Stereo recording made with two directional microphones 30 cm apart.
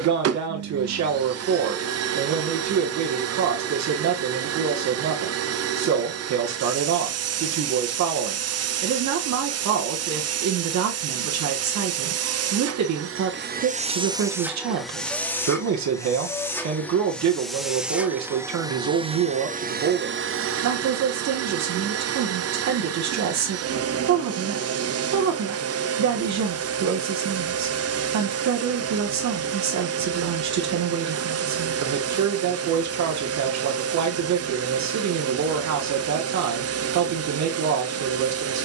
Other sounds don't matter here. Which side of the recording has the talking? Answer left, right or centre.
right.